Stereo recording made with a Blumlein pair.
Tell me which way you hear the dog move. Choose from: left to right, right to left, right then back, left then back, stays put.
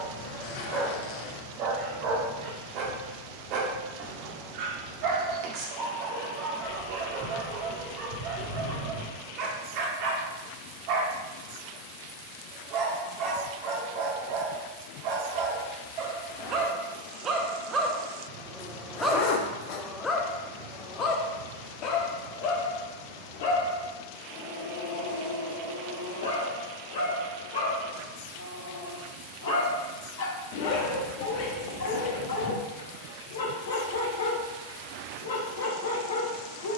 right to left.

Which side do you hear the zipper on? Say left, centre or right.
left.